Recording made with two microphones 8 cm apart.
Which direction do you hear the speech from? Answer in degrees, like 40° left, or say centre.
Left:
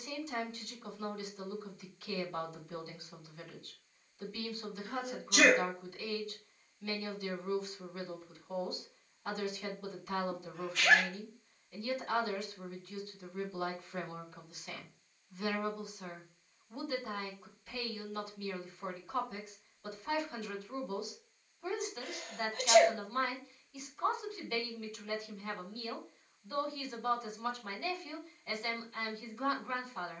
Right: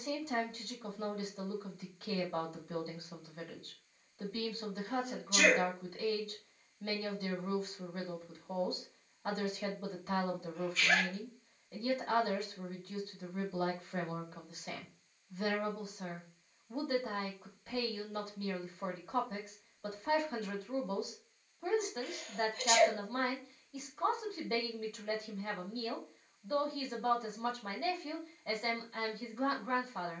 40° right.